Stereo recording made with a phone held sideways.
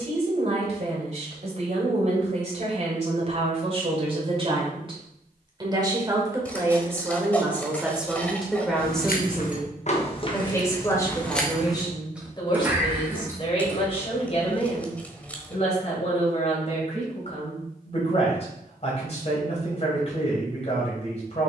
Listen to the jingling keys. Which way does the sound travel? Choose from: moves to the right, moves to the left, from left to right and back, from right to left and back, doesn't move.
moves to the right.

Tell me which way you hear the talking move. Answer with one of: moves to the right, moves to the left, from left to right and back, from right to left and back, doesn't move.
moves to the left.